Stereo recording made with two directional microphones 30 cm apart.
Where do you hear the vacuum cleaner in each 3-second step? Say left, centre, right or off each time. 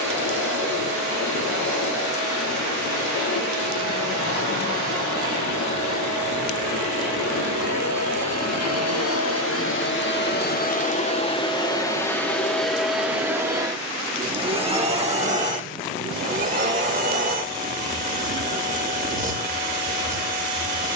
left, left, left, left, centre, right, right.